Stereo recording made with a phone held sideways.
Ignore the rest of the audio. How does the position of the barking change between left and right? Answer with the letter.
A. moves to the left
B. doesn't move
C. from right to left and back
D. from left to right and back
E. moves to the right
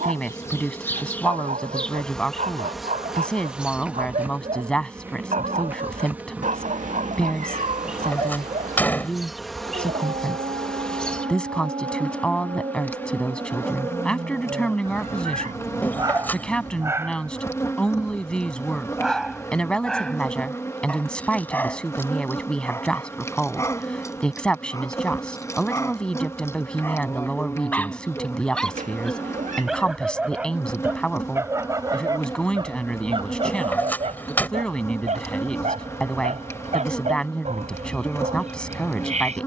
C.